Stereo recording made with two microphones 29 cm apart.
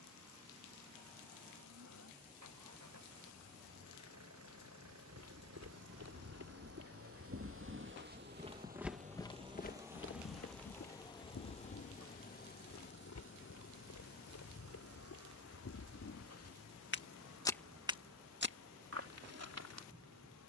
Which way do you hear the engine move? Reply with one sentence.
You can hear the engine move to the left.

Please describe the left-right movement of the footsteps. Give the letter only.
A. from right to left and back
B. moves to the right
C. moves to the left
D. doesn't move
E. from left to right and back
A.